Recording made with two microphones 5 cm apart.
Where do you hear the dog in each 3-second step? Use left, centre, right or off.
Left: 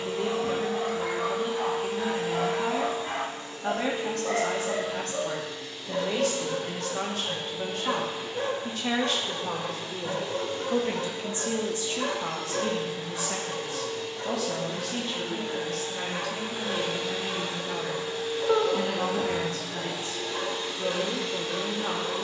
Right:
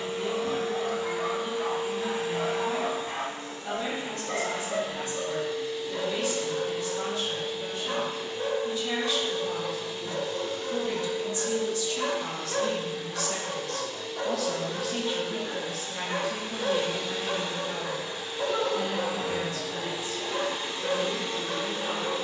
left, left, left, left, right, right, right, right.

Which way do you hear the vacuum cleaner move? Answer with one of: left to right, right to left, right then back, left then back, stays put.
left then back.